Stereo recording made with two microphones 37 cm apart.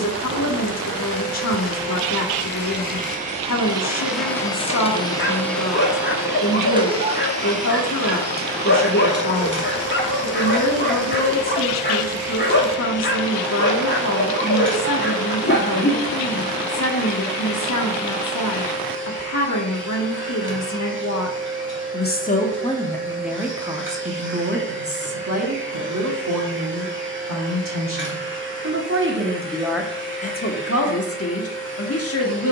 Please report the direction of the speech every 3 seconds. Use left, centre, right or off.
left, left, left, left, left, left, left, centre, right, right, left.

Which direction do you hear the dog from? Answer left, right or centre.
left.